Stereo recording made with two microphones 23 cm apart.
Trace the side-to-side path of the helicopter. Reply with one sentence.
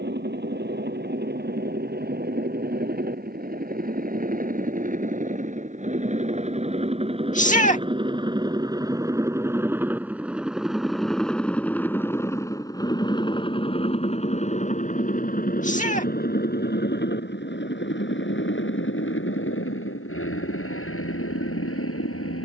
You can hear the helicopter move from right to left.